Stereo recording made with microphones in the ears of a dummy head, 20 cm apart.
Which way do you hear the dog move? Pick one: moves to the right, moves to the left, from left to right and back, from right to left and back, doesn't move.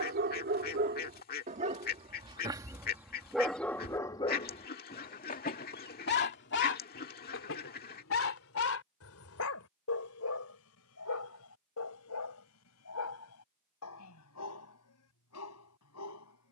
moves to the left.